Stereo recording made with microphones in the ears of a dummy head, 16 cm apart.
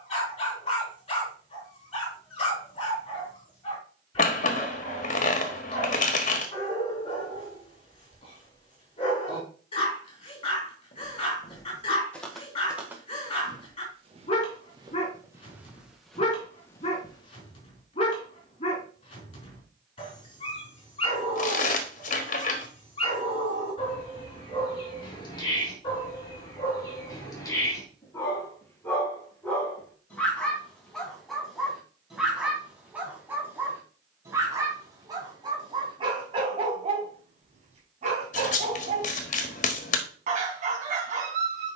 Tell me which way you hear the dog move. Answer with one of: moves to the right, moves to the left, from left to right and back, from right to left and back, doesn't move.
moves to the right.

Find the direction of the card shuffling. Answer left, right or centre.
left.